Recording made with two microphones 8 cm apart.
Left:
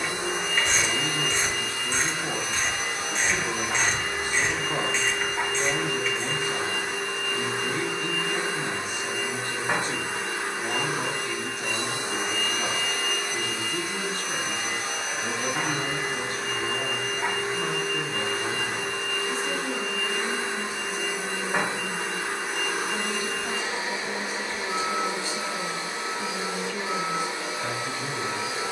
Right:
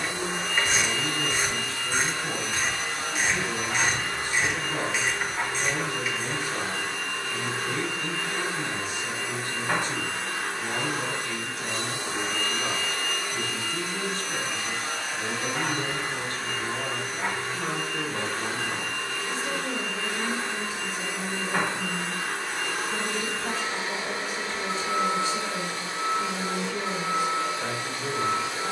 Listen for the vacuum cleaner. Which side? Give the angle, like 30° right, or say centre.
20° left.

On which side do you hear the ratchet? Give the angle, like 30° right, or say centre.
10° right.